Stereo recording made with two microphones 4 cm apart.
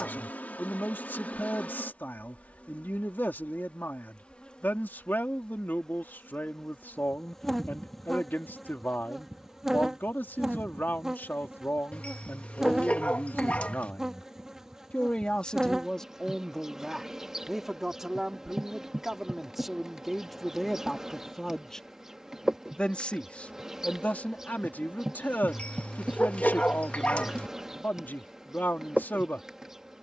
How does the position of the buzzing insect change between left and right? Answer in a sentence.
You can hear the buzzing insect travel towards the right.